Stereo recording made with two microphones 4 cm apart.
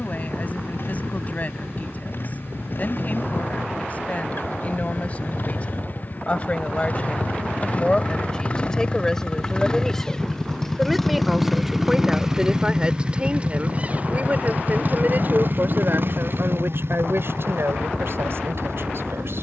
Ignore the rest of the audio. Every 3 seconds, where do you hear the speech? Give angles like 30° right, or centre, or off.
40° left, 30° left, 20° left, centre, 30° right, 60° right, 70° right.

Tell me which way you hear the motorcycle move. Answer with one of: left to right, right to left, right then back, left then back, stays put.
left to right.